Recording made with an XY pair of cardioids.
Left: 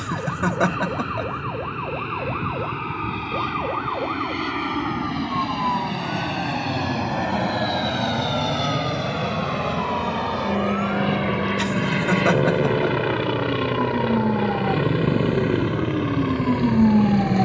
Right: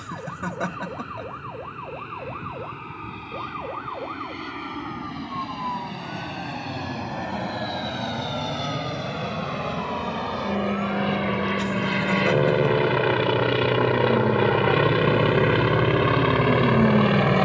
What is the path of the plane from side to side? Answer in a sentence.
In this clip you hear the plane go from the left side to the right.